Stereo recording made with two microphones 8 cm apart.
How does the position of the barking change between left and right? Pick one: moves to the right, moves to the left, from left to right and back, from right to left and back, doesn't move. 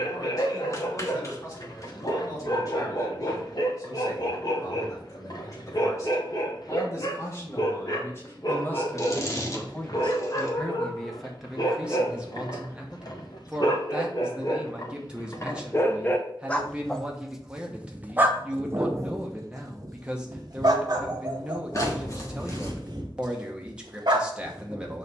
moves to the right.